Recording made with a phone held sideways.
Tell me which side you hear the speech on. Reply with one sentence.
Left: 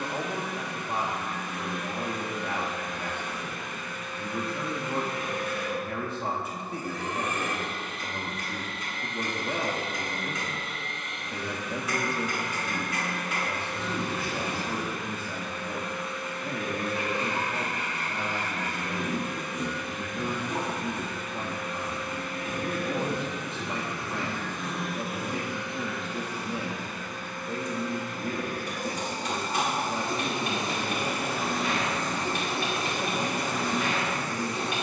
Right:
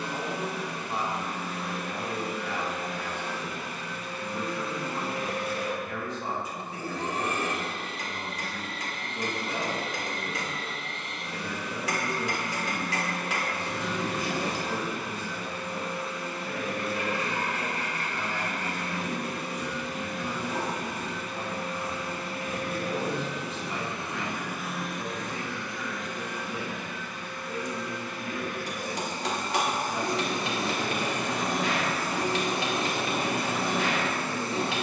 You can hear the speech on the left.